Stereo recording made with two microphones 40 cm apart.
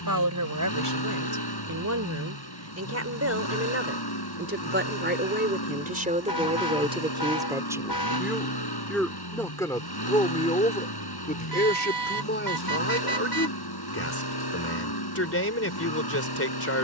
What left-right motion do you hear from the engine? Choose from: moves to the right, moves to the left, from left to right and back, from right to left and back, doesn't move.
doesn't move.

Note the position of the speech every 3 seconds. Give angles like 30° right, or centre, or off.
40° right, 30° right, 10° right, 10° left, 30° left, 30° left.